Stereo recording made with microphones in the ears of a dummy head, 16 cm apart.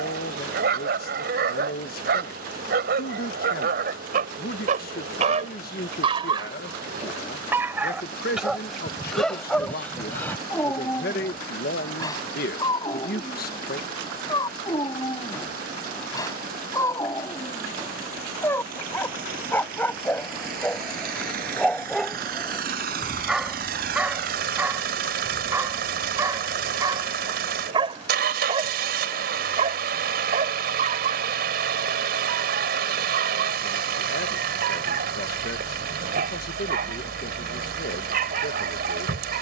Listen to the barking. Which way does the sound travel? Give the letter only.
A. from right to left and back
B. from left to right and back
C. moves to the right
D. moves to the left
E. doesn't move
A.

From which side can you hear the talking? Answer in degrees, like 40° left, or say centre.
60° left.